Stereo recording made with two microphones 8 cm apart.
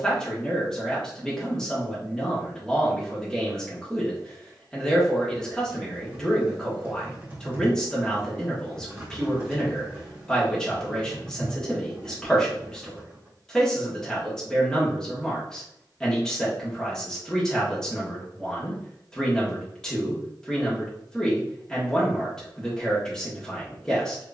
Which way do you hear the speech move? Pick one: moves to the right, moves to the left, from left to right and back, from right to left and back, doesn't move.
doesn't move.